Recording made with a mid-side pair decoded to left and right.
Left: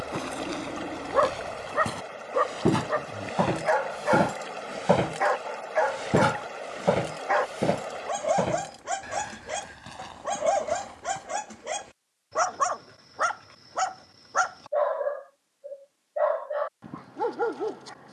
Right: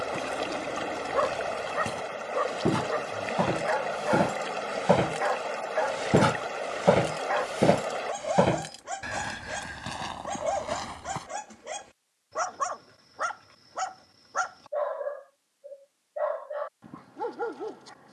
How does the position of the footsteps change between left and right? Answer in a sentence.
In this clip you hear the footsteps travel towards the right.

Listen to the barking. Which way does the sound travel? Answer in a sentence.
You can hear the barking stay put.